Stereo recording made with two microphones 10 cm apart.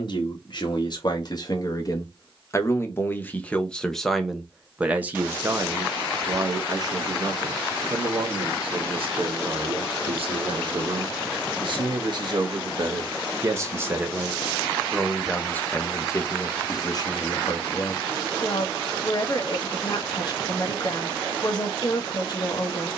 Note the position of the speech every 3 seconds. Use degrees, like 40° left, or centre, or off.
40° left, centre, 50° right, 60° right, 30° right, 30° left, 40° left, 40° left.